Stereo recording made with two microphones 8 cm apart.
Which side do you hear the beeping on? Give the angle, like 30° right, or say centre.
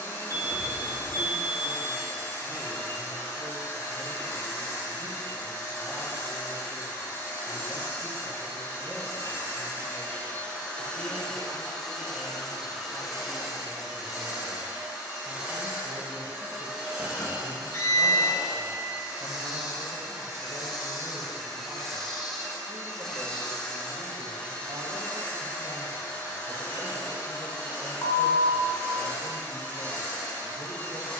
40° left.